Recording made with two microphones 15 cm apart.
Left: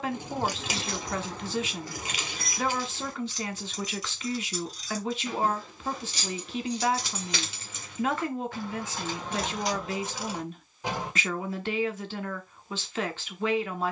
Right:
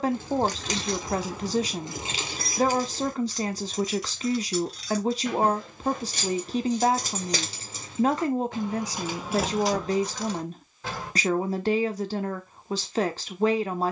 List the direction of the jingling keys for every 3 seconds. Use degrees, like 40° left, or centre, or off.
10° right, 60° right, 40° right, centre, off.